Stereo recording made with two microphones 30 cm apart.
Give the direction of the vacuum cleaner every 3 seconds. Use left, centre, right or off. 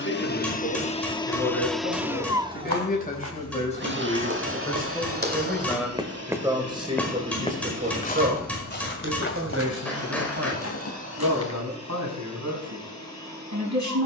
centre, right, right, right, right.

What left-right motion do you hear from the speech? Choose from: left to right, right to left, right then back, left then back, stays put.
left to right.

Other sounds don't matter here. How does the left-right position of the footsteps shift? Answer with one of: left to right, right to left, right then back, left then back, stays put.
right to left.